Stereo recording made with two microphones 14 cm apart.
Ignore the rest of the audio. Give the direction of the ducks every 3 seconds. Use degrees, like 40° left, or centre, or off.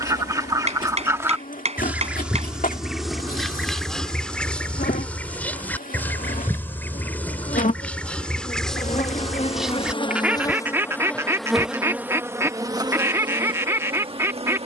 20° right, 10° left, 10° left, 10° right, 20° right.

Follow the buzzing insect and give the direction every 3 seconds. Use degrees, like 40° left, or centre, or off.
80° left, 80° left, 70° left, 20° left, 30° right.